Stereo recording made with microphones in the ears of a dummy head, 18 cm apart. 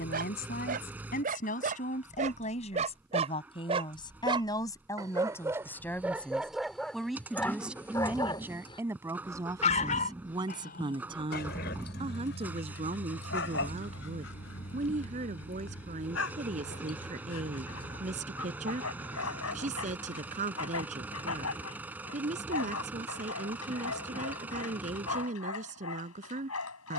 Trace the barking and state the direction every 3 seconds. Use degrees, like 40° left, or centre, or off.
40° right, 20° right, 10° left, 50° left, 60° left, 80° left, 80° left, 80° left, 80° left.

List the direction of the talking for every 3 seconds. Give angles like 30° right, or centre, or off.
40° left, 20° left, centre, 20° right, 30° right, 40° right, 40° right, 40° right, 40° right.